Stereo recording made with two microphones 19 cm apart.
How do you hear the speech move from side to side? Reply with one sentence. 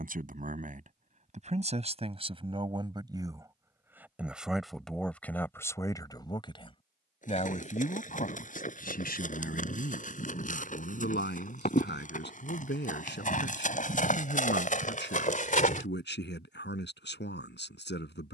In this clip you hear the speech travel towards the left.